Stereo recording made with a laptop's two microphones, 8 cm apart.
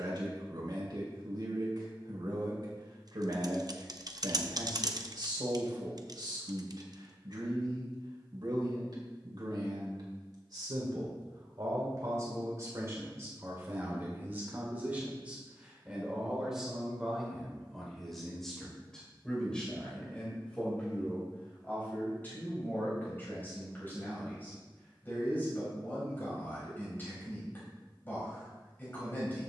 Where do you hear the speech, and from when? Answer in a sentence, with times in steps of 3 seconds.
You can hear the speech on the right from 0 s, in the centre from 15 s and on the left from 21 s.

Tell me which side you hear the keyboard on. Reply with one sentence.
You can hear the keyboard on the right.